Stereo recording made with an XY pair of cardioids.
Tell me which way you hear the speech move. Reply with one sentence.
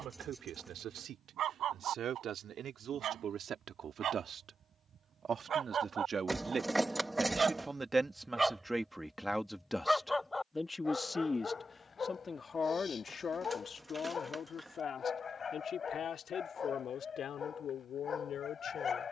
You can hear the speech move to the left.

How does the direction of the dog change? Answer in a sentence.
You can hear the dog move to the left.